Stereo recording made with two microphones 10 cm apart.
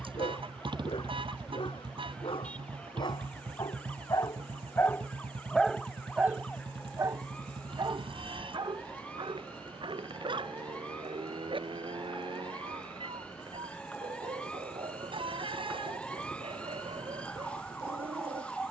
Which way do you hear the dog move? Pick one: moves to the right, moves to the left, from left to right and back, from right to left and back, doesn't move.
moves to the right.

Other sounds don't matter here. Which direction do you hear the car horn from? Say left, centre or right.
right.